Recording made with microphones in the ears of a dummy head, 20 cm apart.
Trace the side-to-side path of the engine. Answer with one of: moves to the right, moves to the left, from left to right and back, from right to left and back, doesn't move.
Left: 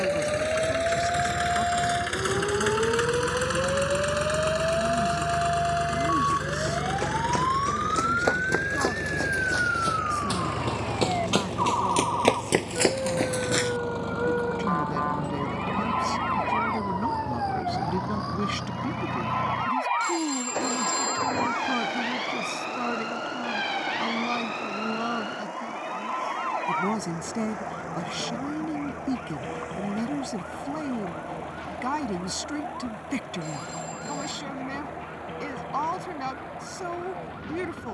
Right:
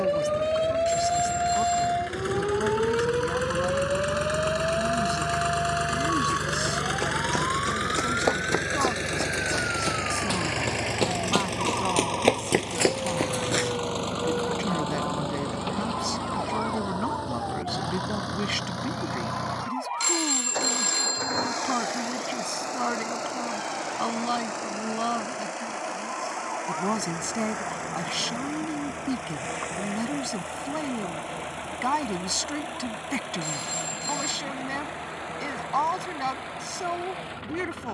moves to the right.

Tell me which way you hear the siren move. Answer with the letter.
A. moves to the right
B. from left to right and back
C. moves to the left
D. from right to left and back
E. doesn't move
C.